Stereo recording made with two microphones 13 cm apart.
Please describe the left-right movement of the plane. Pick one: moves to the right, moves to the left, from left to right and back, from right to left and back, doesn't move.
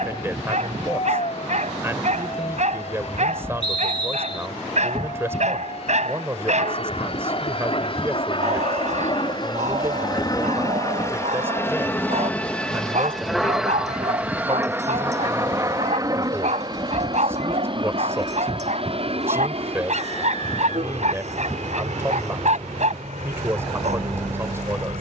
moves to the right.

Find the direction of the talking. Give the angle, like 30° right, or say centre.
20° right.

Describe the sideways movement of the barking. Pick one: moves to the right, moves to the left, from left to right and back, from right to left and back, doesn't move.
doesn't move.